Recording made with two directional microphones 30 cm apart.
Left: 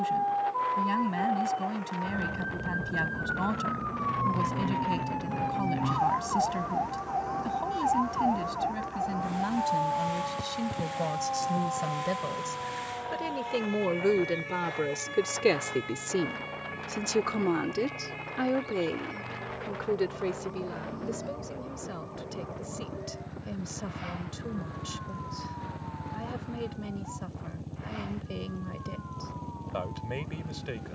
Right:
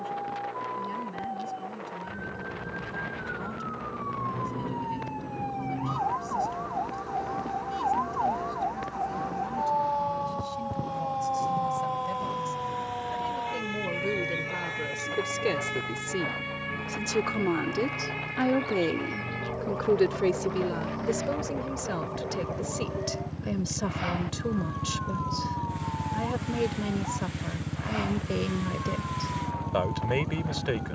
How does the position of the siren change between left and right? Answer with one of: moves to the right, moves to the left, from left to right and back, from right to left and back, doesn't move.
moves to the right.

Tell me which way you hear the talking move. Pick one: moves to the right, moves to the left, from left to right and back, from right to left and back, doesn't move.
moves to the right.